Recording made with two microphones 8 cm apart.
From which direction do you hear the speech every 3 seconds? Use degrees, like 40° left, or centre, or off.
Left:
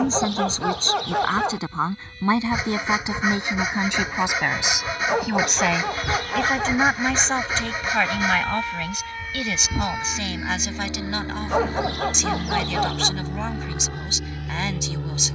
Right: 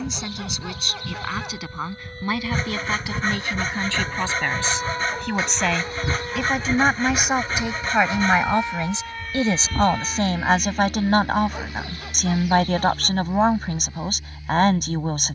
30° left, 10° left, 10° right, 40° right, 50° right.